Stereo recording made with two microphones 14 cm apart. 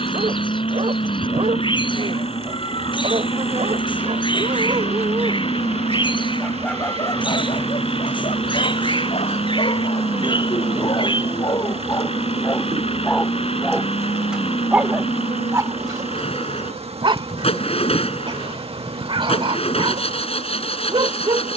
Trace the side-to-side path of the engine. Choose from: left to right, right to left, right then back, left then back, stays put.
stays put.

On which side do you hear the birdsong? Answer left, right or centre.
left.